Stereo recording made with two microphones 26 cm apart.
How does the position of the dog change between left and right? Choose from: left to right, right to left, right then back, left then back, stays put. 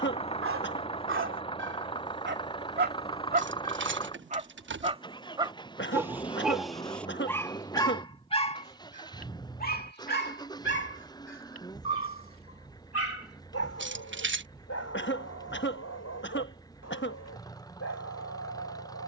right to left.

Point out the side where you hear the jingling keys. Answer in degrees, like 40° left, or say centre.
50° right.